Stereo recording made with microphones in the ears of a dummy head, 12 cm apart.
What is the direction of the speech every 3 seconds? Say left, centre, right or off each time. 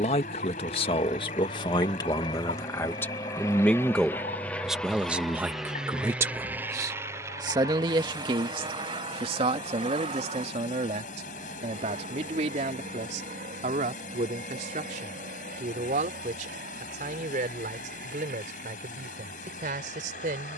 left, centre, right, right, right, right, right.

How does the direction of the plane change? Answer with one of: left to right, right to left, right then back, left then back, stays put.
left to right.